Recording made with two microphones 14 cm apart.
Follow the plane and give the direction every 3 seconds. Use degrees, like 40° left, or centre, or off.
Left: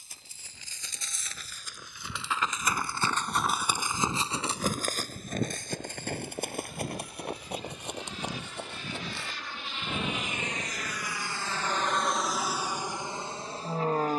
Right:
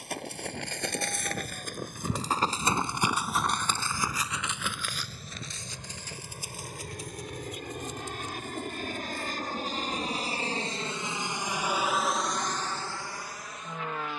80° right, 70° right, 60° right, 30° right, 20° left.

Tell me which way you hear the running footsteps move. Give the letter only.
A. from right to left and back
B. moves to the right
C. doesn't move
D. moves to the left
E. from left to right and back
D.